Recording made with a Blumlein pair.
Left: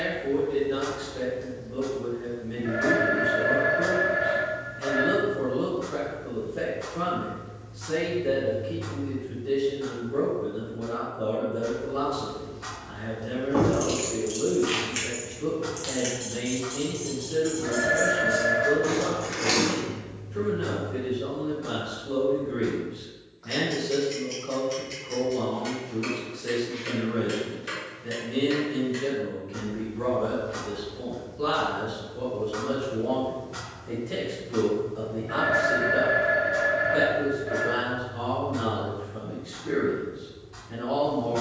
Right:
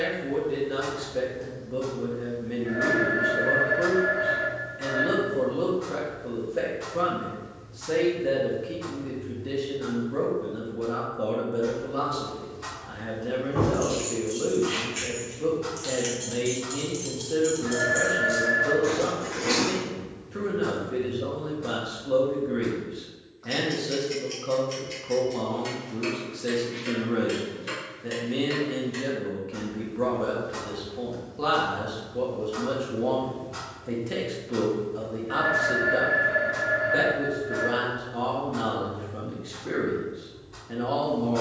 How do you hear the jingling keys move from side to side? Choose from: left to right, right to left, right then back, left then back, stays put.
right then back.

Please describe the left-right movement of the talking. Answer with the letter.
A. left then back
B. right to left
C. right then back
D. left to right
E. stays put
E.